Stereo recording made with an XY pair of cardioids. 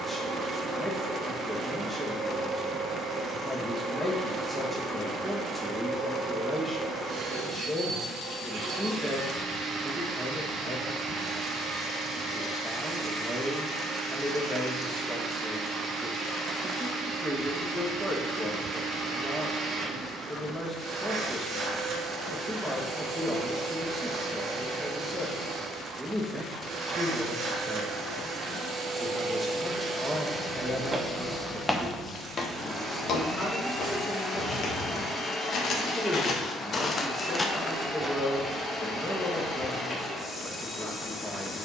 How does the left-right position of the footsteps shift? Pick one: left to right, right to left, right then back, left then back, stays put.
left then back.